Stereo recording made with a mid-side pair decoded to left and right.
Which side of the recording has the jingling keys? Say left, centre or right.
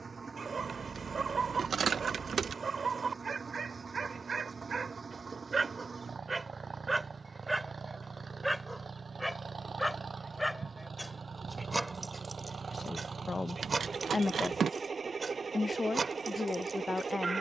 right.